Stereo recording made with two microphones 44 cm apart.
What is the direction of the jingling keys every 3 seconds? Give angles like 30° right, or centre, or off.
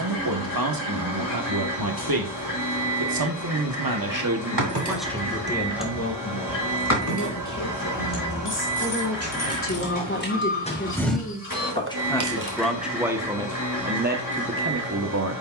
off, 40° right, 40° left, 20° left, 50° right.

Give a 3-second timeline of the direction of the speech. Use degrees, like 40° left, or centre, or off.
50° right, 20° right, 40° left, 20° left, 10° right.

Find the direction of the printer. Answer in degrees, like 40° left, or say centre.
50° left.